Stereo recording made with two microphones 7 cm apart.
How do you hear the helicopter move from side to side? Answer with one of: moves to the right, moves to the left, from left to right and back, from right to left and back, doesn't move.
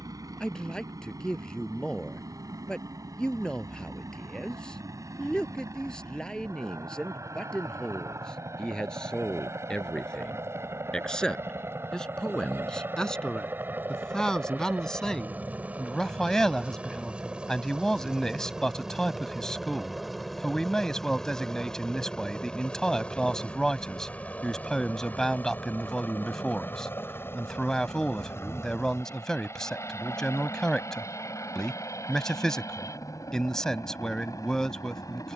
moves to the left.